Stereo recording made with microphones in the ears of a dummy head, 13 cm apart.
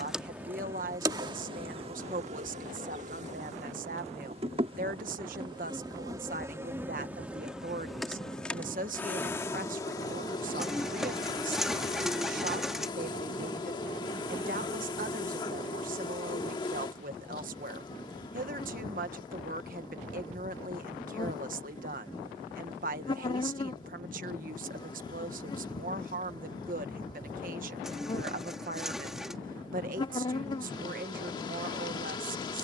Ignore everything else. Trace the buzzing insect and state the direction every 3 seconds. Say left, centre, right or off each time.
right, right, centre, left, left, left, left, left, left, left, left.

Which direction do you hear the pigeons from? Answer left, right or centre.
centre.